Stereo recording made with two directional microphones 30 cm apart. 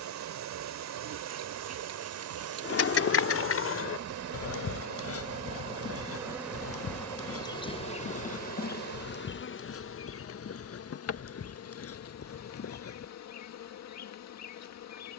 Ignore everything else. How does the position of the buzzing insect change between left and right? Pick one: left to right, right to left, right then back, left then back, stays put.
right to left.